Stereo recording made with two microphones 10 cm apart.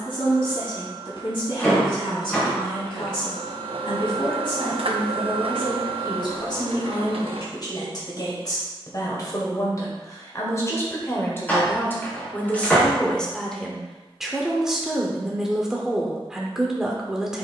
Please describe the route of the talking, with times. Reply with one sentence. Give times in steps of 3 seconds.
You can hear the talking on the left from 0 s and in the centre from 12 s.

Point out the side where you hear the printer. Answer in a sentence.
You can hear the printer on the right.